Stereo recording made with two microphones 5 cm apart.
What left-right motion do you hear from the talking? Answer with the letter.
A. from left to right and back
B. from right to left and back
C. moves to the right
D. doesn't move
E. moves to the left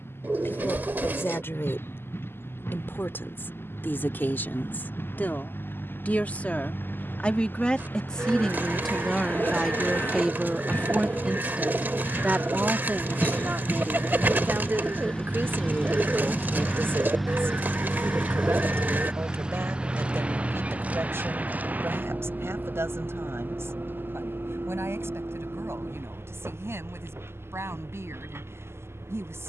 C.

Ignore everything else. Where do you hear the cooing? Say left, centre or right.
right.